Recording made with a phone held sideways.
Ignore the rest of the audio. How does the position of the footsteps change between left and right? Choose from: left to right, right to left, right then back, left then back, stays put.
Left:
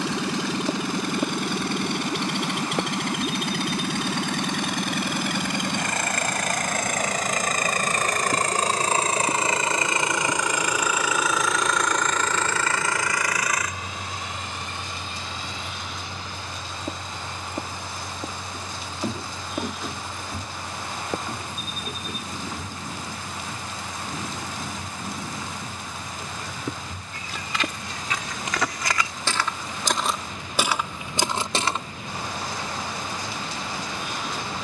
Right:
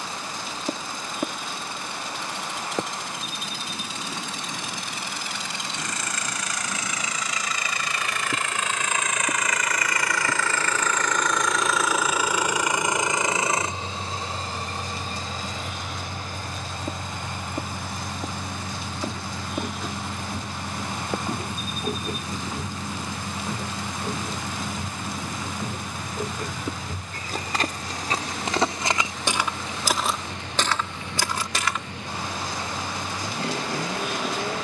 right then back.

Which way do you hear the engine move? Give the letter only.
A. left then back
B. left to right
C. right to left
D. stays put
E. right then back
B.